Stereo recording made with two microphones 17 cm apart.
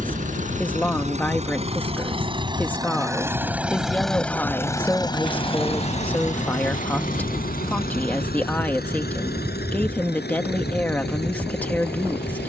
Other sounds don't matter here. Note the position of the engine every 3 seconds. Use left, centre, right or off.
right, centre, left, left.